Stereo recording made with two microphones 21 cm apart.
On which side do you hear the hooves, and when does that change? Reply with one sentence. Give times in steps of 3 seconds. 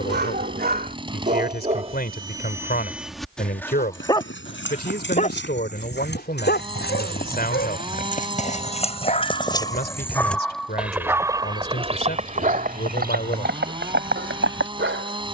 You can hear the hooves not at all from 0 s, on the left from 3 s, in the centre from 9 s and on the right from 12 s.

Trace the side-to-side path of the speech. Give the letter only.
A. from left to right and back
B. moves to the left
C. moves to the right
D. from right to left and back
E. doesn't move
E.